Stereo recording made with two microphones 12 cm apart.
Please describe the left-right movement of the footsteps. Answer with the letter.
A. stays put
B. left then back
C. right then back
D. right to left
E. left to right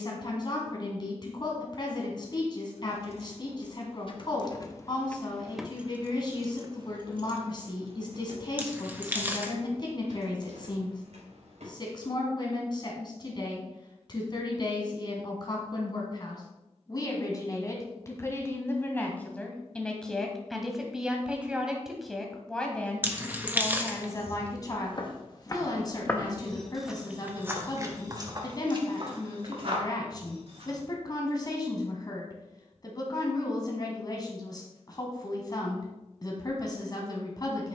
E.